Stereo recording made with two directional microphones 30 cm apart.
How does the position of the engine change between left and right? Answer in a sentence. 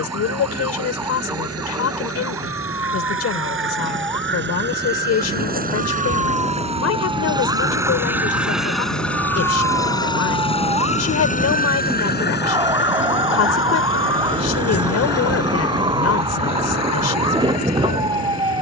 You can hear the engine go from the right side to the left.